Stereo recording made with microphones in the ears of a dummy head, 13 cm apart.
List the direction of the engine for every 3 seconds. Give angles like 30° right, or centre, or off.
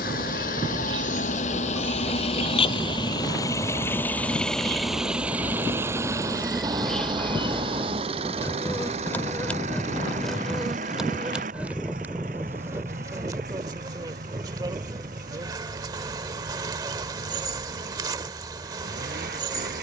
50° left, 10° left, 30° right, 50° right, 60° right, 60° right, 60° right.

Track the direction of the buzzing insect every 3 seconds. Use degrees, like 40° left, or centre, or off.
30° right, 30° right, 10° left, centre, 20° right, 30° right, 30° right.